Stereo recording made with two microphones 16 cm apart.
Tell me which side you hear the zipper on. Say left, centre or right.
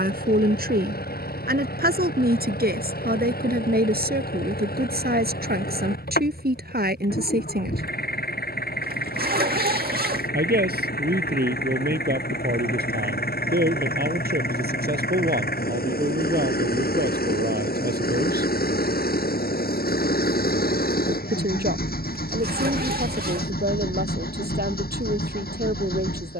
right.